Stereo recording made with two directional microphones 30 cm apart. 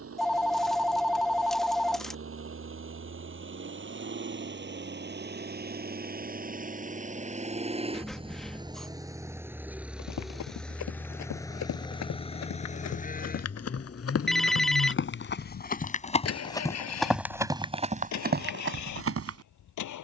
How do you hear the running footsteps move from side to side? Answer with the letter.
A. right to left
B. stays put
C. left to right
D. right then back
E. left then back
C.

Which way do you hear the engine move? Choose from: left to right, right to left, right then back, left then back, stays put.
right to left.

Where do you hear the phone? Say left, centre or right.
centre.